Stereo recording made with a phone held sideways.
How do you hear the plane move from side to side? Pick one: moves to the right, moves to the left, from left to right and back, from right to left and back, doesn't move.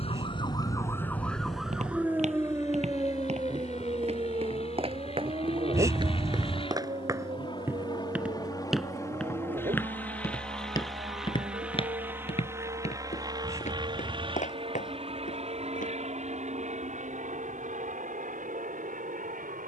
moves to the right.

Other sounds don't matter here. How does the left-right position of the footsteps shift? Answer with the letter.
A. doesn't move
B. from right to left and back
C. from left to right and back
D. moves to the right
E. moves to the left
E.